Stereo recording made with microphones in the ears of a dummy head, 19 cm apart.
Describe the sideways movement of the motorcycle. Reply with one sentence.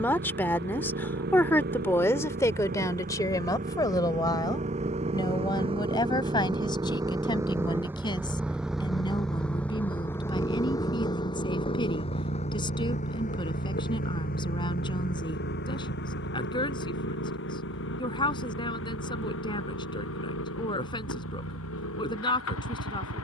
In this clip you hear the motorcycle go from the right side to the left.